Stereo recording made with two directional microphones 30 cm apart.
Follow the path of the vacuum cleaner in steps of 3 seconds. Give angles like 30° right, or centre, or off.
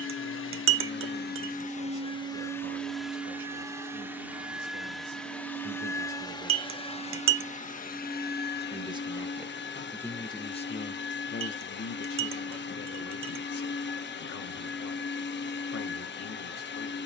30° left, centre, 30° left, 40° left, 40° left, 40° left.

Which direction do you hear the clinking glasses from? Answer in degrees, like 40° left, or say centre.
50° right.